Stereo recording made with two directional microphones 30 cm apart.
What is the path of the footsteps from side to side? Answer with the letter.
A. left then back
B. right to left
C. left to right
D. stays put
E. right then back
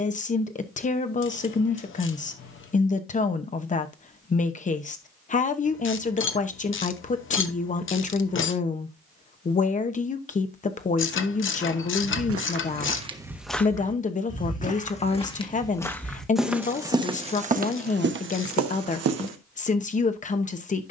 A.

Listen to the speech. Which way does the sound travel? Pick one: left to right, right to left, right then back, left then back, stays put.
stays put.